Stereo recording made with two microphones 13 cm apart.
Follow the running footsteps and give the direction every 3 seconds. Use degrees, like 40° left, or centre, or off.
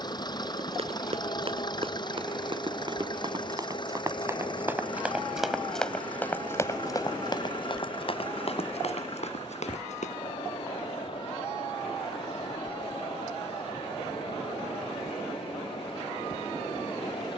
40° right, 20° right, 40° left, 60° left, off, off.